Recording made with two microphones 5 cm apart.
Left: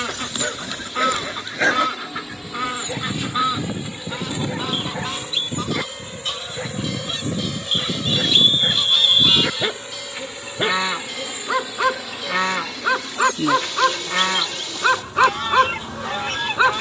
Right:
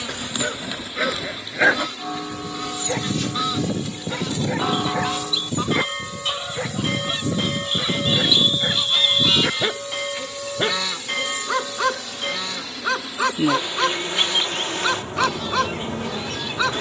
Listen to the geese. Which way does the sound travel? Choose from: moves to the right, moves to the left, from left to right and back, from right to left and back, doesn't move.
from left to right and back.